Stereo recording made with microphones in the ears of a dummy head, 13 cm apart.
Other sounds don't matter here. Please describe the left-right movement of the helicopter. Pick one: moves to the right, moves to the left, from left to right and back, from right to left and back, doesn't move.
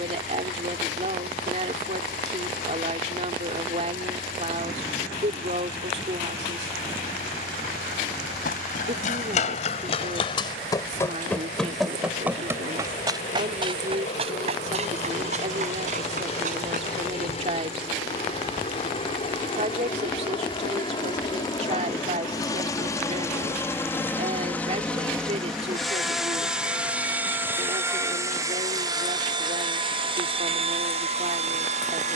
moves to the right.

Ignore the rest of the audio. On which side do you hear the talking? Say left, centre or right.
right.